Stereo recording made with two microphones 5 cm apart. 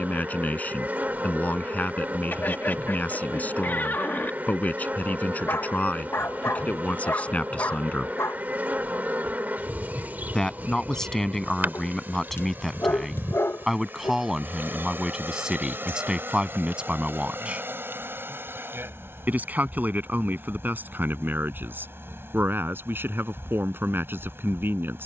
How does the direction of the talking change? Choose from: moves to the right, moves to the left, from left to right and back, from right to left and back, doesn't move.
moves to the right.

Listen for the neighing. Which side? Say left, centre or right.
left.